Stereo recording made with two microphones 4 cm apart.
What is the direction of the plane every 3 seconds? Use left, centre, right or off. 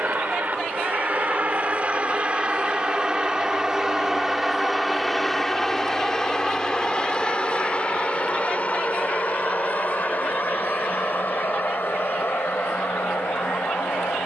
right, centre, left, left, left.